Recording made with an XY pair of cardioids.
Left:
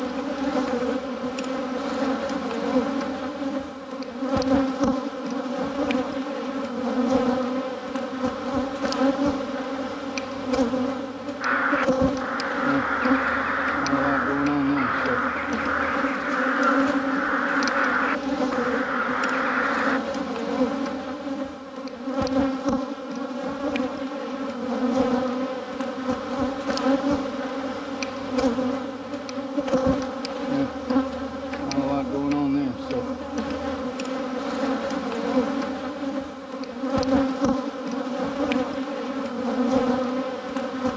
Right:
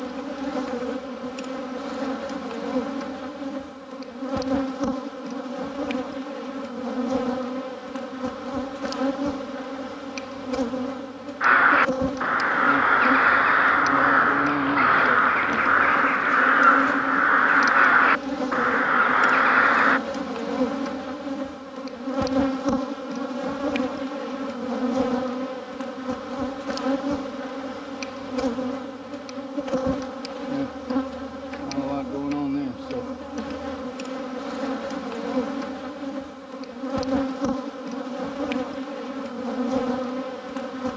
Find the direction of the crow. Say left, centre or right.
right.